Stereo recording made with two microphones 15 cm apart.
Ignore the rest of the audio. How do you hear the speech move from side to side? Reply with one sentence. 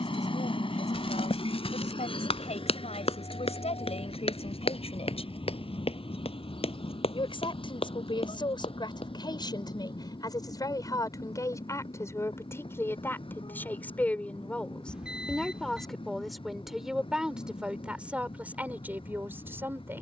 You can hear the speech travel towards the right.